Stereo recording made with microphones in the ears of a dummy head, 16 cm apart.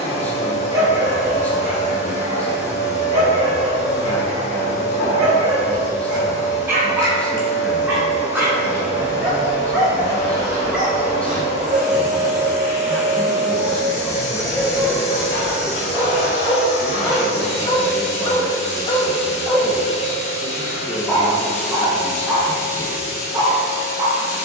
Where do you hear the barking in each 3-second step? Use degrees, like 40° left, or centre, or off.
20° right, 20° right, 10° right, 10° right, centre, 20° left, 20° left, 10° right.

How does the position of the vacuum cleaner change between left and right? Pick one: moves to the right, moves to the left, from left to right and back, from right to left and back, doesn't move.
doesn't move.